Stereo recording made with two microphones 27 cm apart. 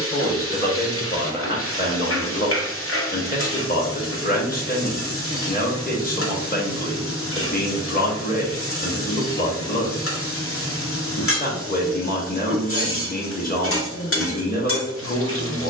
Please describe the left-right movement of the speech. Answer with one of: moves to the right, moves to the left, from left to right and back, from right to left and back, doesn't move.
doesn't move.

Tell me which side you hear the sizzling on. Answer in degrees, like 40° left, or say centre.
50° left.